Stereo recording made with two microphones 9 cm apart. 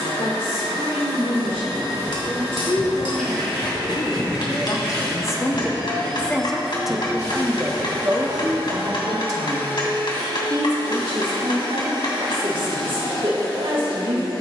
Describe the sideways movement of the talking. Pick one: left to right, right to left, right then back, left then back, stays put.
left to right.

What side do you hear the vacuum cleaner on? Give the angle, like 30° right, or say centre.
40° left.